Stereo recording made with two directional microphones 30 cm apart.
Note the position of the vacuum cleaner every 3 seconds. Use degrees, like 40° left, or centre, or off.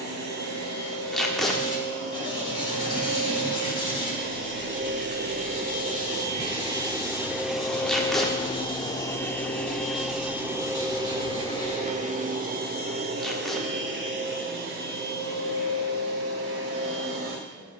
50° right, 40° right, centre, 10° right, 30° right, 50° right.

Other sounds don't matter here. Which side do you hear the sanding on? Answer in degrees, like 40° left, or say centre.
20° left.